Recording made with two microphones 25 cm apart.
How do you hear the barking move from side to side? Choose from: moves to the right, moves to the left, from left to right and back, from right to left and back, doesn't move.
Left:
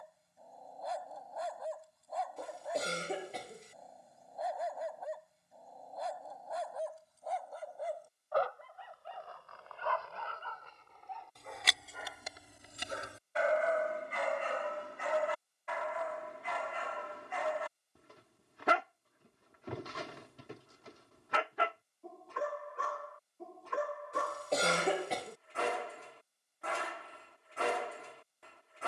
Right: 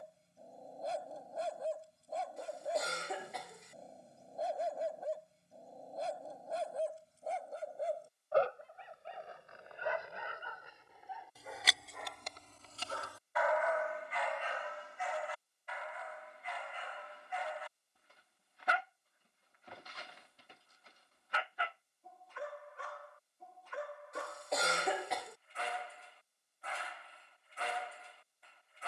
moves to the left.